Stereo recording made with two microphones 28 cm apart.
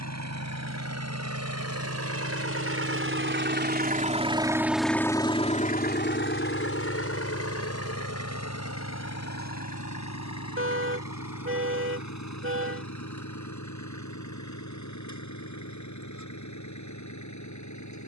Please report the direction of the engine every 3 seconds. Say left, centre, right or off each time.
right, centre, left, left, left, left.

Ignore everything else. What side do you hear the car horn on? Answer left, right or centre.
right.